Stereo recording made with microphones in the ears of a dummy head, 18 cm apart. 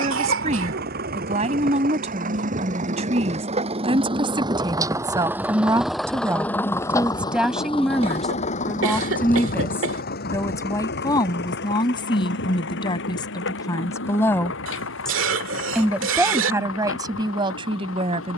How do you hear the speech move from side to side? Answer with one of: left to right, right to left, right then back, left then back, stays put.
left then back.